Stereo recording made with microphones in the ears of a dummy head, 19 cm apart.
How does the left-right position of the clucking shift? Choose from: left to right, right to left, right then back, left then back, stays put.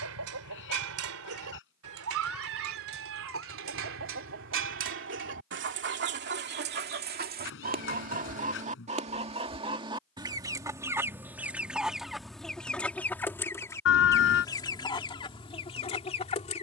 right to left.